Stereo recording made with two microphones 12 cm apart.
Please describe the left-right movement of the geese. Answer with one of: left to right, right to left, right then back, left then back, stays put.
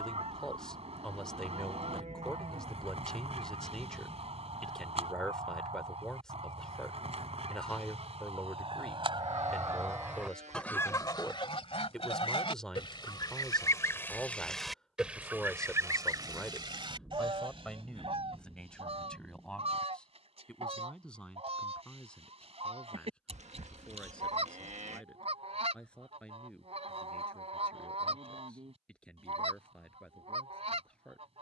left then back.